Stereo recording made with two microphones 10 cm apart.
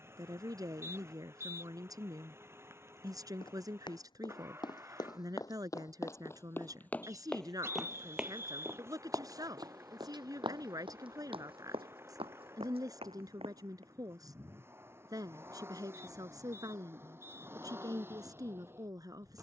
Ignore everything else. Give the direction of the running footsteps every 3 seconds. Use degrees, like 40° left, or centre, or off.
off, 40° left, centre, 50° right, 70° right, off, off.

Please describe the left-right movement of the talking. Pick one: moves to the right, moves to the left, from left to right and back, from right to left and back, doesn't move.
doesn't move.